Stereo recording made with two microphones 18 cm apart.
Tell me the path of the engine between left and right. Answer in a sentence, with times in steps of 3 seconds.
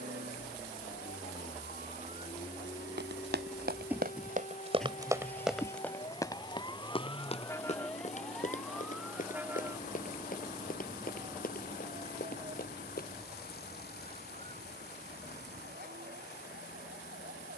You can hear the engine on the right from 0 s, in the centre from 3 s and on the left from 6 s.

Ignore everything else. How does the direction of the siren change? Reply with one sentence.
You can hear the siren travel towards the right.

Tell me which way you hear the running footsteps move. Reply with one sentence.
In this clip you hear the running footsteps move to the left.